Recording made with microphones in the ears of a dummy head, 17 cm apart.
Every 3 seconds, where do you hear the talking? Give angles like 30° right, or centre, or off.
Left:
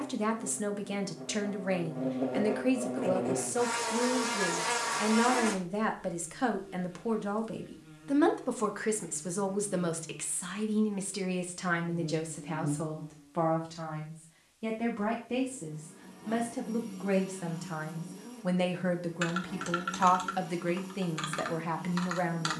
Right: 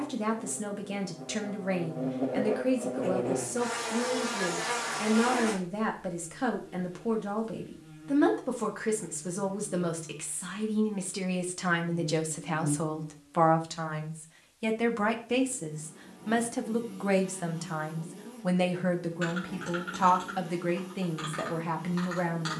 20° left, 20° left, 20° left, 10° left, 40° right, 30° right, 10° left, 10° left.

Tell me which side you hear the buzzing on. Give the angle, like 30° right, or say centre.
30° left.